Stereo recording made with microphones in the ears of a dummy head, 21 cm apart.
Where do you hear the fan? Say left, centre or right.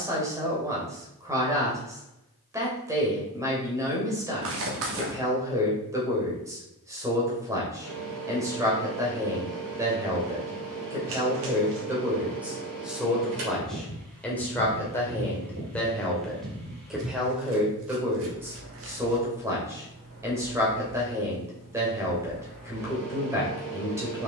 right.